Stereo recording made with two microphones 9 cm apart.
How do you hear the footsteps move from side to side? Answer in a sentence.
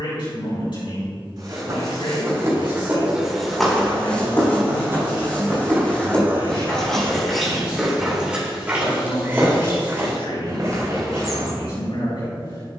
You can hear the footsteps move from right to left and back again.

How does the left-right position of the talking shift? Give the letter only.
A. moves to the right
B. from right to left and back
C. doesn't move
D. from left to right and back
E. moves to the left
C.